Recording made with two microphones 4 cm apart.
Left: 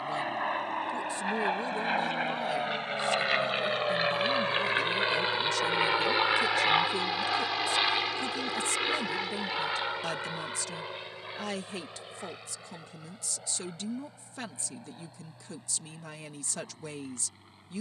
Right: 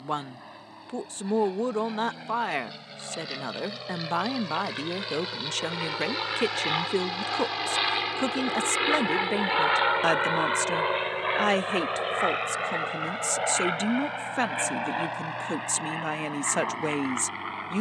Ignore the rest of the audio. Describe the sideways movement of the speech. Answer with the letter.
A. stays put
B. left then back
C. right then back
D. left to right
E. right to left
A.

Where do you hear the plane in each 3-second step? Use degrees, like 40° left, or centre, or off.
60° left, 40° left, centre, 40° right, 60° right, 70° right.